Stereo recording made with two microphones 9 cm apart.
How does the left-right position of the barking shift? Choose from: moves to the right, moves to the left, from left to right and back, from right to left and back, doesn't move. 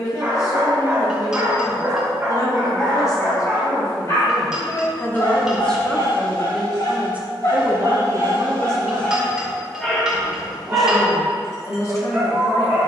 from right to left and back.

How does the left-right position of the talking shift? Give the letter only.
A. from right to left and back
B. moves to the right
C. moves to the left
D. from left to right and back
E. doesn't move
D.